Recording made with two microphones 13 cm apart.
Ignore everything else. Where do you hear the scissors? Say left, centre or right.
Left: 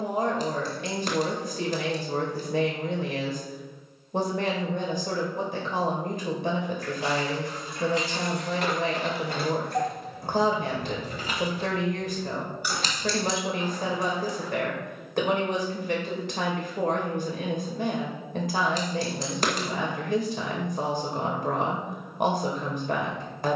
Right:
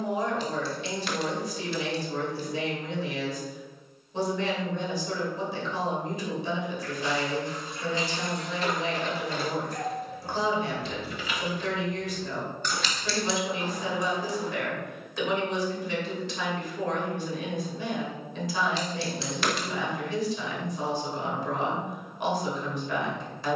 left.